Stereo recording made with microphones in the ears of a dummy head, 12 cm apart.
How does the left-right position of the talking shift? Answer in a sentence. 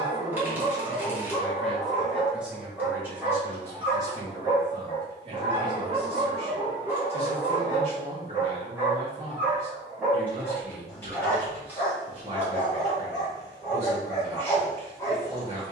In this clip you hear the talking travel towards the right.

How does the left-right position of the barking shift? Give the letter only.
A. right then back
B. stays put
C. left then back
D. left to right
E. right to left
A.